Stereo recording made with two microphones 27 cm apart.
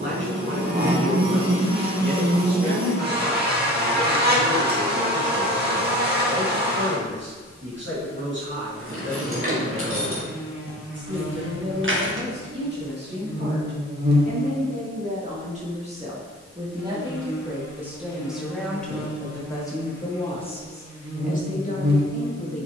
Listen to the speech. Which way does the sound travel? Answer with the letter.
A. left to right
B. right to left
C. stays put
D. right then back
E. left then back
B.